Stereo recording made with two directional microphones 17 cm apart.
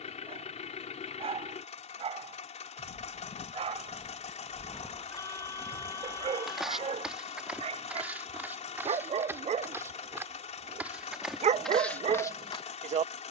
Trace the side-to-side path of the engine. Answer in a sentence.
You can hear the engine stay put.